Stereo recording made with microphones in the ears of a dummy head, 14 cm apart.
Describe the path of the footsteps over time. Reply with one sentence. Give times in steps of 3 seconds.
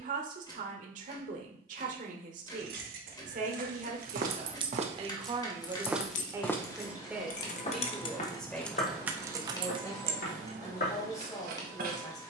In this clip you hear the footsteps not at all from 0 s, on the right from 3 s and on the left from 6 s.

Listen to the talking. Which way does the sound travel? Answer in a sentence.
In this clip you hear the talking move to the left.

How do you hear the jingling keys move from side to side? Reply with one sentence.
You can hear the jingling keys go left and come back.